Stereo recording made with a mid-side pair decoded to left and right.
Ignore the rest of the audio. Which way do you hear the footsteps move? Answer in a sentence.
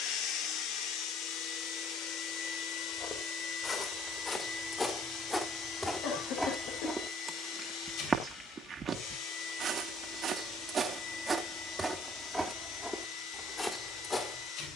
In this clip you hear the footsteps move from left to right and back again.